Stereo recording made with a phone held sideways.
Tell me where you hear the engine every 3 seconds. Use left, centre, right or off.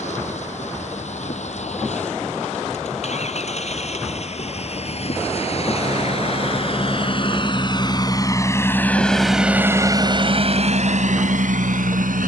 left, left, left, right.